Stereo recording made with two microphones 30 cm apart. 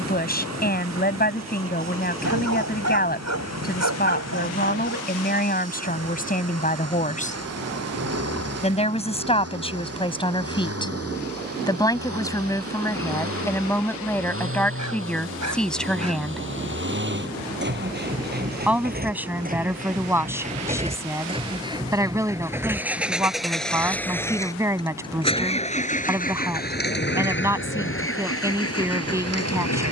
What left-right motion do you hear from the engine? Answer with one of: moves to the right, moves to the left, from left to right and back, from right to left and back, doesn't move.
moves to the left.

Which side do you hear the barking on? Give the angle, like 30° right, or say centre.
60° right.